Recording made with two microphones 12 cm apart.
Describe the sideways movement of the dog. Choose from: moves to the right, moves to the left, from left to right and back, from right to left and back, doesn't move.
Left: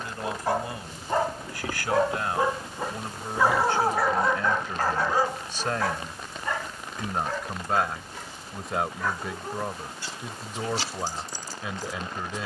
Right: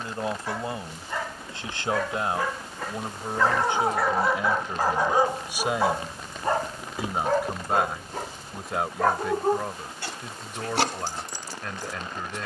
moves to the right.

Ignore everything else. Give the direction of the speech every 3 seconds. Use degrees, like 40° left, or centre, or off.
30° right, 20° right, 10° right, centre.